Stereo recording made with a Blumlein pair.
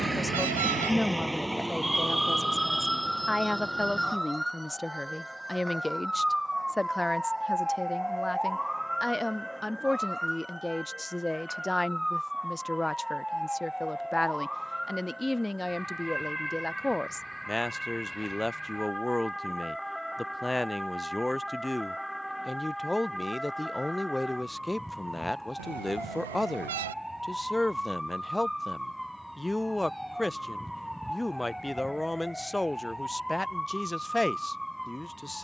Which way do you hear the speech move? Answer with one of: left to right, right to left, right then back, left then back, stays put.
stays put.